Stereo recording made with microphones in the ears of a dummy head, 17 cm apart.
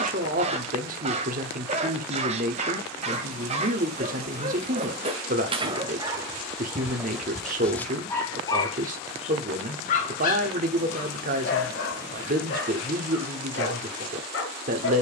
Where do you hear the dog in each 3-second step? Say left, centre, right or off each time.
right, right, centre, left, left.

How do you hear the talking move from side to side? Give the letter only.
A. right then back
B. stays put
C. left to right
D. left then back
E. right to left
B.